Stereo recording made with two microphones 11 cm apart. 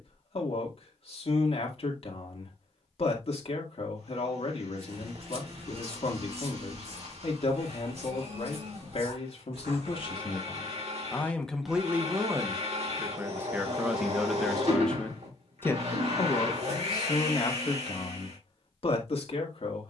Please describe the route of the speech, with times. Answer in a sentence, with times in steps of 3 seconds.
In this clip you hear the speech on the left from 0 s, in the centre from 12 s and on the left from 15 s.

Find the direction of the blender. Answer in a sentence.
In this clip you hear the blender on the right.